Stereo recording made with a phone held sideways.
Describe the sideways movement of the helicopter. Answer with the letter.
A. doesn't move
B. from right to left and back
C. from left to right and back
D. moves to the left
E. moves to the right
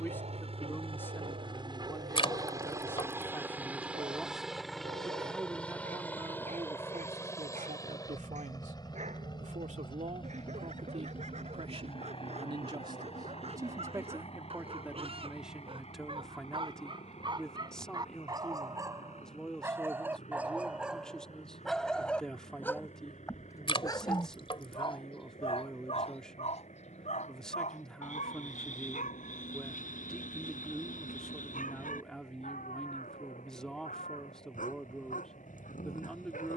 D.